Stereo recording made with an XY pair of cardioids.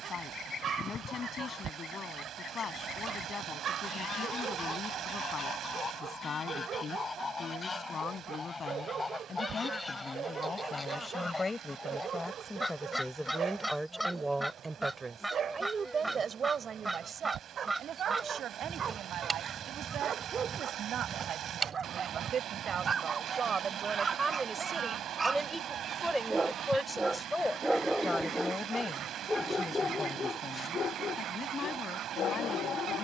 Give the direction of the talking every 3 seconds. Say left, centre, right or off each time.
left, left, left, left, centre, right, right, right, centre, left, left.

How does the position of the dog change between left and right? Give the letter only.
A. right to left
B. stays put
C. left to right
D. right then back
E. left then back
A.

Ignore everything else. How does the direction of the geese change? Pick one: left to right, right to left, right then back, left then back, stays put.
left to right.